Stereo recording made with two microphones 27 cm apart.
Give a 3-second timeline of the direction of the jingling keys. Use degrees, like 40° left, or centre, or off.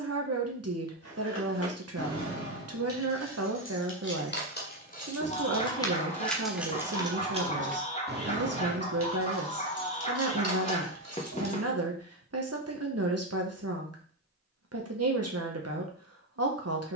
60° left, 40° left, 20° right, 60° right, off, off.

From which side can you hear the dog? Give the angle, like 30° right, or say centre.
20° left.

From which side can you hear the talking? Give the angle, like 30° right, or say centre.
60° right.